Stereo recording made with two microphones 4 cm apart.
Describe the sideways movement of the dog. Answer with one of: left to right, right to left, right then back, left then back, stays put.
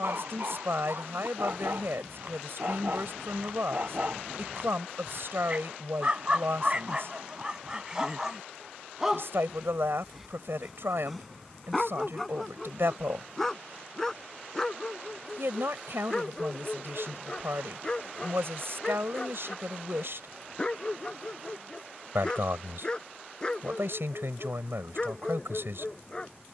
right to left.